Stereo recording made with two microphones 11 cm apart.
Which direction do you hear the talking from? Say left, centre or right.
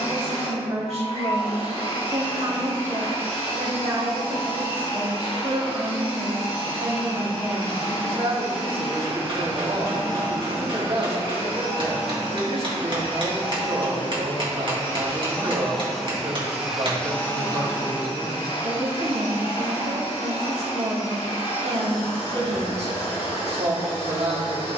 right.